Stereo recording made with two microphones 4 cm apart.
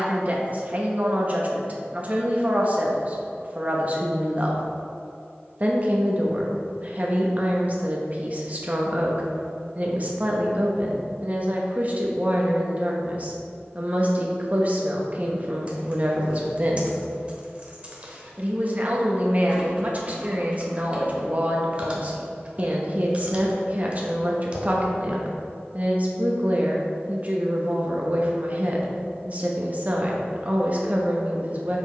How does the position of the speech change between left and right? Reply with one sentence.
You can hear the speech stay put.